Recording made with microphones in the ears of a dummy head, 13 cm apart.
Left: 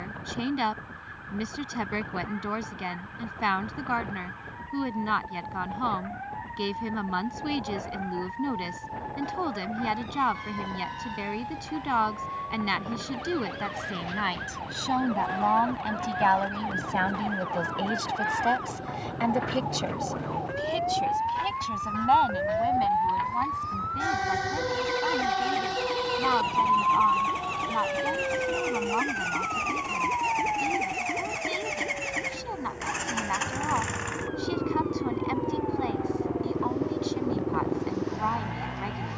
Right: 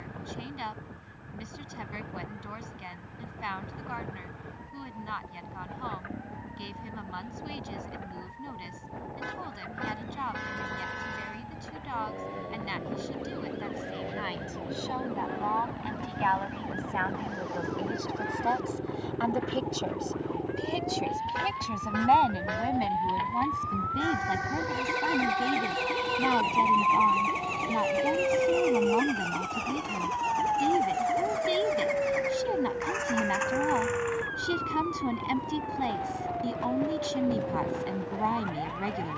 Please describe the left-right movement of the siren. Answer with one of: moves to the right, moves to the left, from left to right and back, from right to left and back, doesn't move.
moves to the right.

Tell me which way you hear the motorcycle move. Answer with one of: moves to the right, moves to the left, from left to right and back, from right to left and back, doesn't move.
moves to the left.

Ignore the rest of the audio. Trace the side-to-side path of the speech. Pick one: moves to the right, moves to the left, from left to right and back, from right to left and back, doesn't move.
moves to the right.